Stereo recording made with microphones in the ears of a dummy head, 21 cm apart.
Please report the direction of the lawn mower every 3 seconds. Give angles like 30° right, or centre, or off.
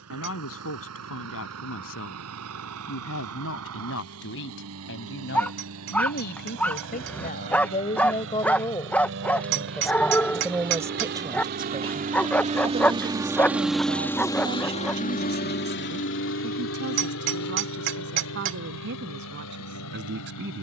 70° right, 70° right, 60° right, 50° right, 10° right, 60° left, 80° left.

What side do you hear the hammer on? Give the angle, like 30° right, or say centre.
60° right.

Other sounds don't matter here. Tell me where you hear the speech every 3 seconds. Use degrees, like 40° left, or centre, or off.
70° left, 60° left, 30° left, 10° right, 40° right, 50° right, 50° right.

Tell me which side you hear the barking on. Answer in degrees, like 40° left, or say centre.
10° left.